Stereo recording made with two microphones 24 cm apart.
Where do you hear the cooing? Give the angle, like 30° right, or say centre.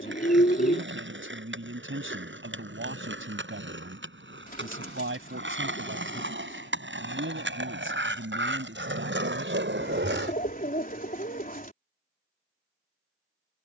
40° left.